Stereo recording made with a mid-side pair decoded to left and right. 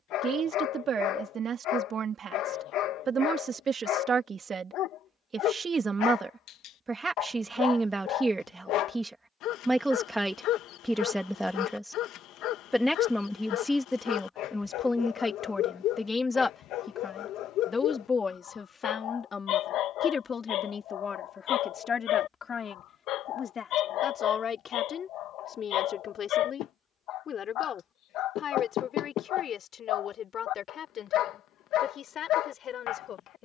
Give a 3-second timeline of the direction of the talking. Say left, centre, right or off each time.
right, right, right, centre, centre, left, left, left, left, left, left.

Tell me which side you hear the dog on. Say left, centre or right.
left.